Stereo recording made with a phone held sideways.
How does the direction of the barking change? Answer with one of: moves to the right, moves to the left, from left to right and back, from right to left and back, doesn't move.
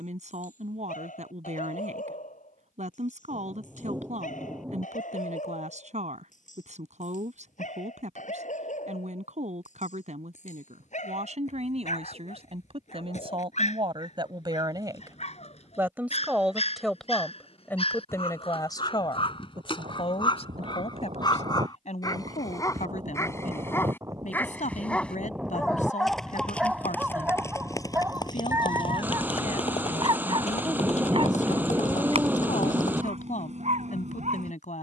moves to the right.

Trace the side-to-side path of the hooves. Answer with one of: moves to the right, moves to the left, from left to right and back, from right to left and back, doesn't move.
moves to the left.